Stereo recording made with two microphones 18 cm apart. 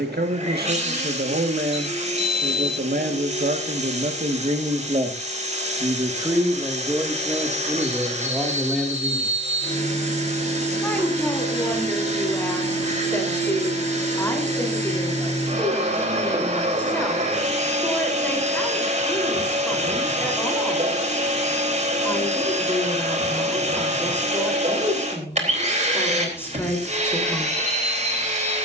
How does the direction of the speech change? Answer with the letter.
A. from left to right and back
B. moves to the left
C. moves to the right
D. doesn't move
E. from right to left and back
B.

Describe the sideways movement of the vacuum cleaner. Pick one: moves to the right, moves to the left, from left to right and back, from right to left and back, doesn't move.
doesn't move.